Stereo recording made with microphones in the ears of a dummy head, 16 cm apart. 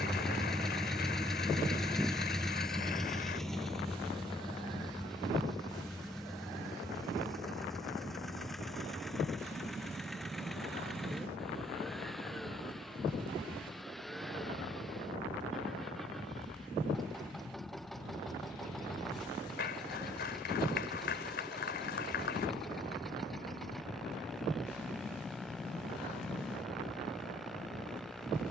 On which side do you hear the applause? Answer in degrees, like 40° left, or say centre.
60° left.